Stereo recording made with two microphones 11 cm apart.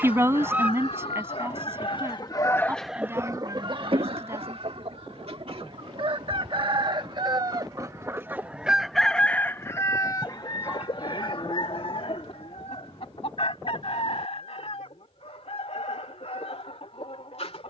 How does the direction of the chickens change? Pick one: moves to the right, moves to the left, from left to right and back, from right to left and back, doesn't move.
from left to right and back.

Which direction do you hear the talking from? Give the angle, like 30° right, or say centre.
20° right.